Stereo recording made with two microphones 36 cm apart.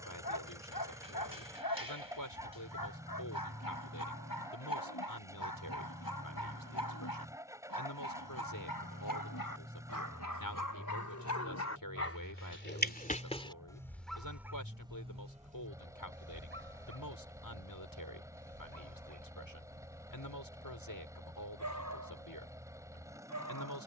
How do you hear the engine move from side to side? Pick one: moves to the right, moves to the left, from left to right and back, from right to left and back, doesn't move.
doesn't move.